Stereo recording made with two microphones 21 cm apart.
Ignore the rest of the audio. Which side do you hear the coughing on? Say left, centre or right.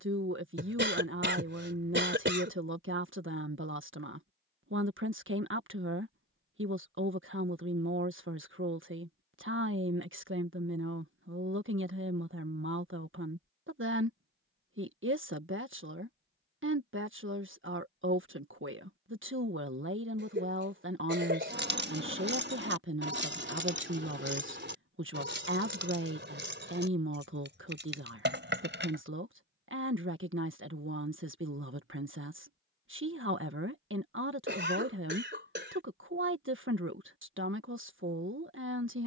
right.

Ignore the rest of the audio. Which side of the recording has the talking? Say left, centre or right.
right.